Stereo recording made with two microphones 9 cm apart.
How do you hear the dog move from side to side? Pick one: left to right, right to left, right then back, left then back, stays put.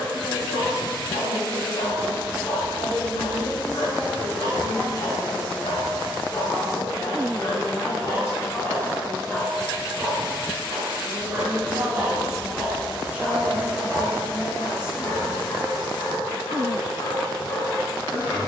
right then back.